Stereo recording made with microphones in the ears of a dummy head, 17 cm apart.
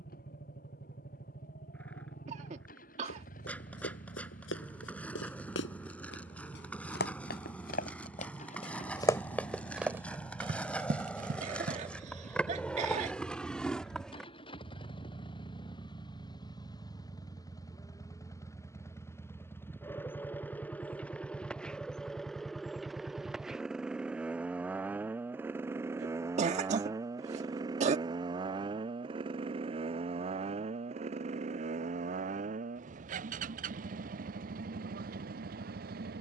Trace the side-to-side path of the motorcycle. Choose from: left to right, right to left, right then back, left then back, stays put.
left to right.